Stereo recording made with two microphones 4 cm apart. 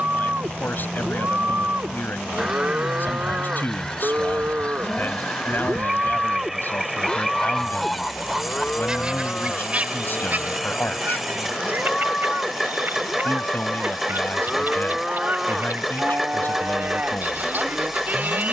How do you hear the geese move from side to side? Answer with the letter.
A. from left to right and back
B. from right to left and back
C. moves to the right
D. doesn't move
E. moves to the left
B.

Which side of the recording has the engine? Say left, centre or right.
centre.